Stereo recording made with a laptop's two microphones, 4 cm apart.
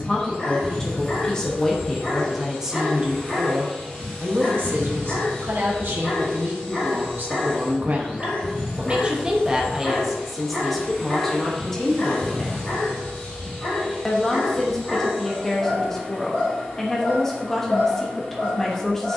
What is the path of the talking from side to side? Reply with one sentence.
In this clip you hear the talking go right and come back.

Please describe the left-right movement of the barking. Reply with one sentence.
You can hear the barking stay in one place.